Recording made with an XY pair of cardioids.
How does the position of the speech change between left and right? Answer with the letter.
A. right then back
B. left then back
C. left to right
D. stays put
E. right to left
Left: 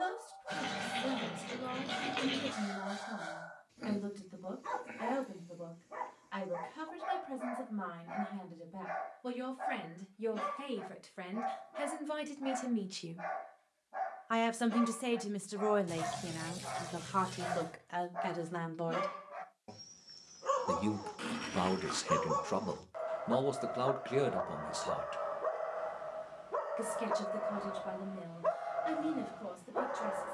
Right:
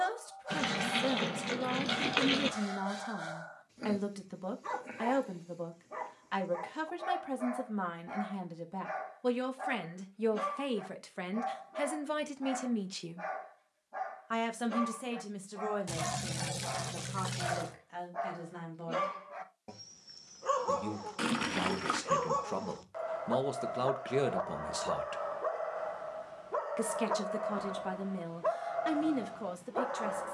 B.